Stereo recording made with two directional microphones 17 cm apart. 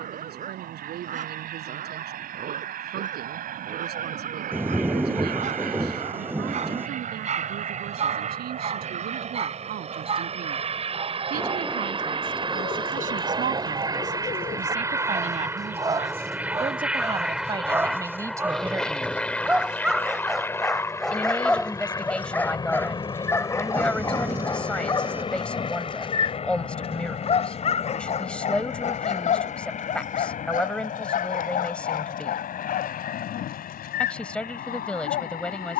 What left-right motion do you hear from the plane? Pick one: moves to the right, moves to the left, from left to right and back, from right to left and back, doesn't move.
moves to the left.